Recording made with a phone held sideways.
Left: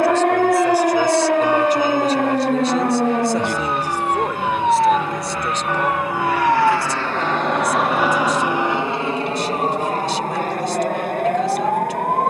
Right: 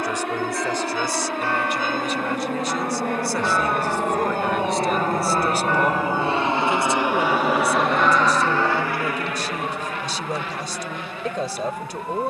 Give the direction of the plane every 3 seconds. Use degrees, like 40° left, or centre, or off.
70° right, 50° right, 10° right, 40° left.